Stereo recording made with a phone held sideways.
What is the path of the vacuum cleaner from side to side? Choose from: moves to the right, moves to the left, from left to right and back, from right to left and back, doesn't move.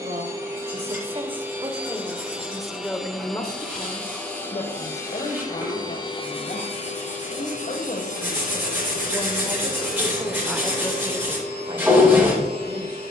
moves to the left.